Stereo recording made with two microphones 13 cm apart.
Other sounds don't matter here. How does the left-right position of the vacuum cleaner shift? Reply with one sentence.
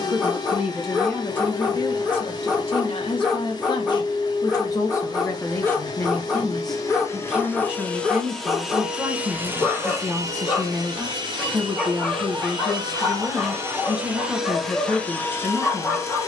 In this clip you hear the vacuum cleaner go right and come back.